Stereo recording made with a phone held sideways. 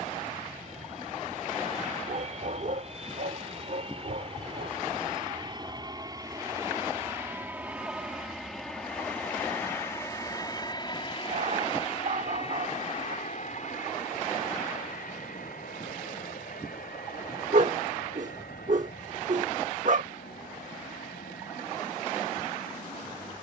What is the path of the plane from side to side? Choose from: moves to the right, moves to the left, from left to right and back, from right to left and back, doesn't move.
moves to the left.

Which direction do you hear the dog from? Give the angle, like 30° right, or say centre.
60° right.